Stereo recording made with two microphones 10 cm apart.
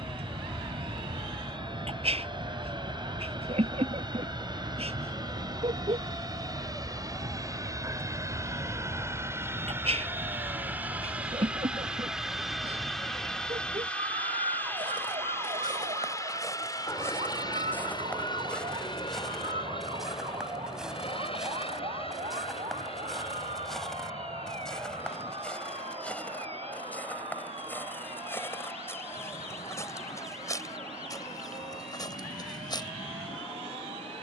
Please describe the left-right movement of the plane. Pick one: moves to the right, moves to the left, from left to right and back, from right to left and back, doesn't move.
moves to the left.